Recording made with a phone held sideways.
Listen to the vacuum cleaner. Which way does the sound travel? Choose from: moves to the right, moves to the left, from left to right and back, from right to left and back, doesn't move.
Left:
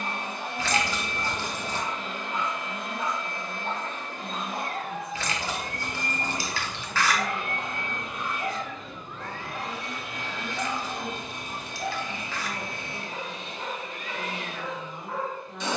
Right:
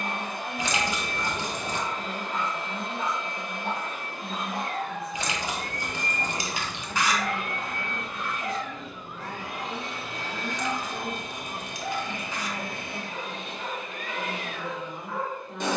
from right to left and back.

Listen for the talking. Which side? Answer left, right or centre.
centre.